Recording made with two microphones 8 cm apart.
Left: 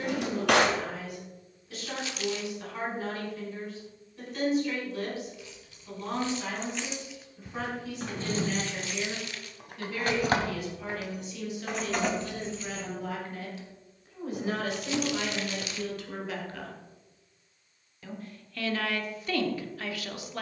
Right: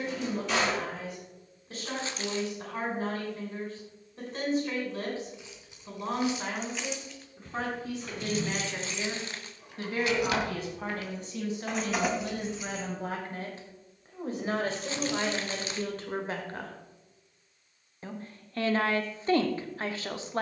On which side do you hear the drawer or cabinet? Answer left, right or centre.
left.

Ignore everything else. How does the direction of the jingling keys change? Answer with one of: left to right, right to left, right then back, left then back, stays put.
left then back.